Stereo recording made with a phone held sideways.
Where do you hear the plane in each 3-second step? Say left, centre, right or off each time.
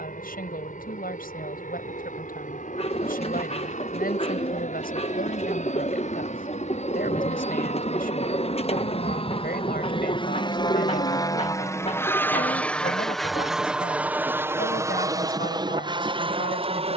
left, left, left, left, centre, right.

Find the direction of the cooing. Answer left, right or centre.
left.